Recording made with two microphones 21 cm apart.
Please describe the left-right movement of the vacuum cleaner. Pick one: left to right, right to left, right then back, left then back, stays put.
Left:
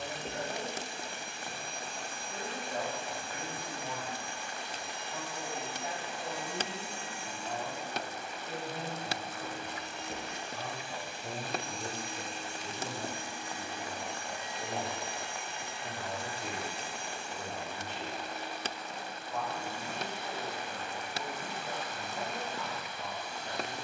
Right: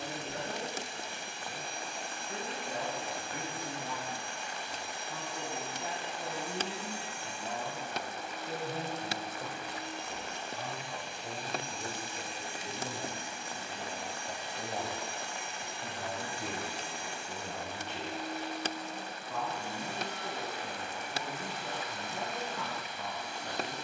left to right.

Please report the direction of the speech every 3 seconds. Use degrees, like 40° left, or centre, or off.
70° right, 70° right, 60° right, 10° right, 20° right, 60° right, 70° right, 70° right.